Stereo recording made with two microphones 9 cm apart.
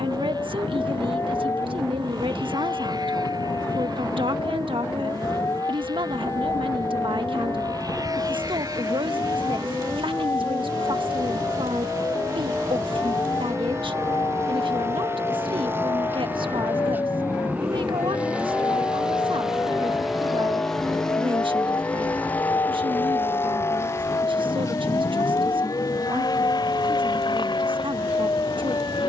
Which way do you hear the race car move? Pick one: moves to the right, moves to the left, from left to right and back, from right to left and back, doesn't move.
moves to the left.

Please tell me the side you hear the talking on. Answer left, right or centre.
right.